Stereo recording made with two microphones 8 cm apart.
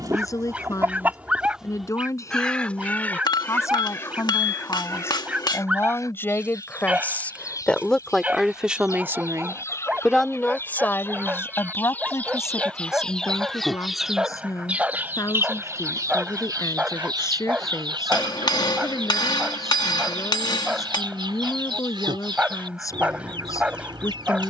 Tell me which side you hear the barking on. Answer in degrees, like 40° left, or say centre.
20° right.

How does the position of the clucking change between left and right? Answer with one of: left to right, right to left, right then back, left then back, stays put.
left then back.